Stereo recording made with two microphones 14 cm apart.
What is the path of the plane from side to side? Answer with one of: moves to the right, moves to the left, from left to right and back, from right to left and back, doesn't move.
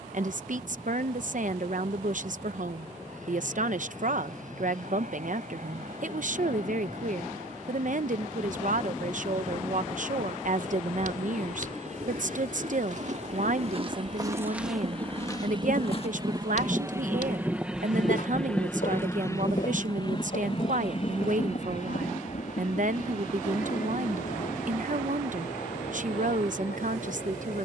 moves to the left.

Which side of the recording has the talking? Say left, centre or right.
right.